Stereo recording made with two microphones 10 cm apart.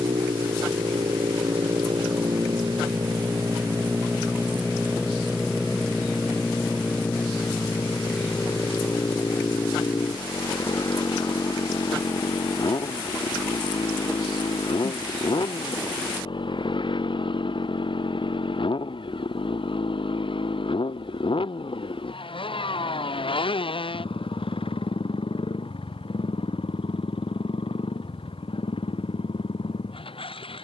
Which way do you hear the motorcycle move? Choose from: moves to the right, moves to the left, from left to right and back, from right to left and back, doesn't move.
moves to the left.